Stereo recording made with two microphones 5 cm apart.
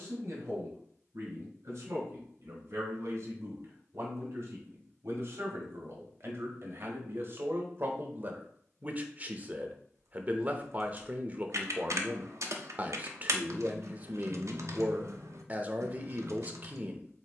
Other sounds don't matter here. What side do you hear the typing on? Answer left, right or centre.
right.